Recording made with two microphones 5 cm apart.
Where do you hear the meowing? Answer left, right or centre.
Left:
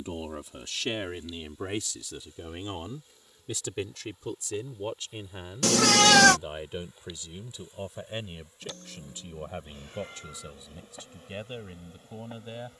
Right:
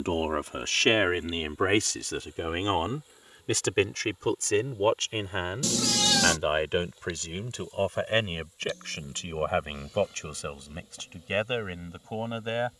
left.